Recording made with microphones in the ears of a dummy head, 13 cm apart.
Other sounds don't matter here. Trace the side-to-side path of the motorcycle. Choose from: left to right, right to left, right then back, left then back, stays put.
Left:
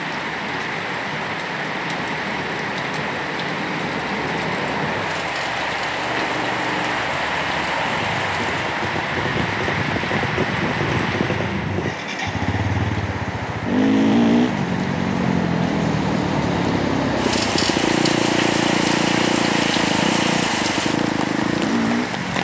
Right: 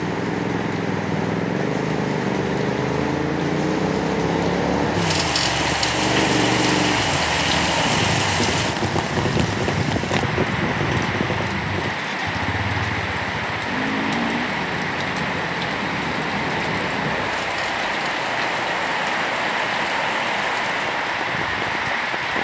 right to left.